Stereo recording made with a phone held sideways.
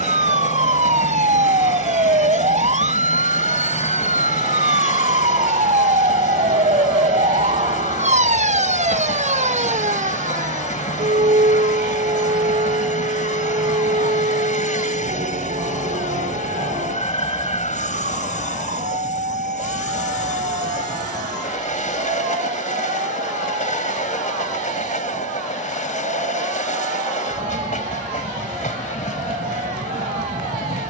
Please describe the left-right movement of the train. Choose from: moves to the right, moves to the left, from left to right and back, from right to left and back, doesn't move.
doesn't move.